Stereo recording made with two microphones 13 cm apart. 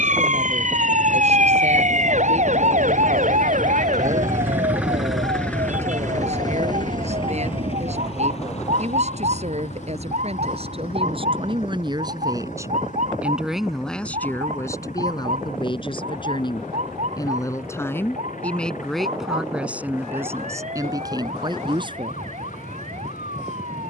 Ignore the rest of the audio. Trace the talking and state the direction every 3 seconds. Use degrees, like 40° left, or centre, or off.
60° right, 60° right, 60° right, 50° right, centre, 30° left, 10° right, 40° right.